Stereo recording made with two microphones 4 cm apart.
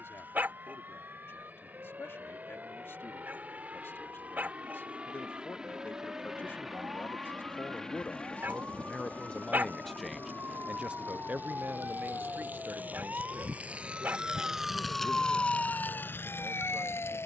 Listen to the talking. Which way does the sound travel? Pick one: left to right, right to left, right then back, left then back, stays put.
left to right.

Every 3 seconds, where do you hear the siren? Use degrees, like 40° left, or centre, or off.
60° right, 60° right, 60° right, 50° right, 30° right, 50° left.